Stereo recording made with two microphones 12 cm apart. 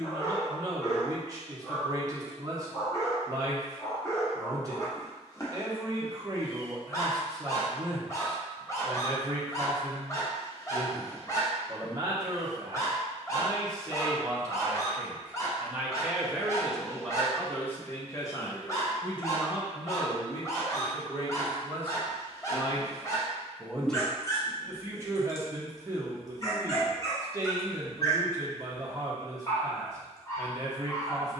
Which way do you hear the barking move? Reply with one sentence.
You can hear the barking stay in one place.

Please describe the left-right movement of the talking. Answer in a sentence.
In this clip you hear the talking move from right to left and back again.